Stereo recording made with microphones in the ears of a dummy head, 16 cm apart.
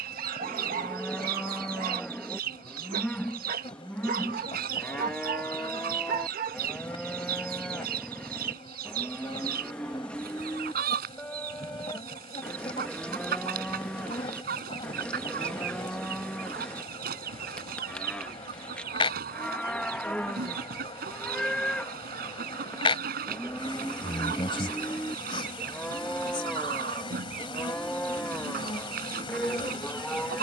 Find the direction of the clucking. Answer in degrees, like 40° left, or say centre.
50° right.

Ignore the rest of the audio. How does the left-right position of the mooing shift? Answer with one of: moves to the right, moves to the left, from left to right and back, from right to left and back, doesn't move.
doesn't move.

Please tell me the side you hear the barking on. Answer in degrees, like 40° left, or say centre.
40° right.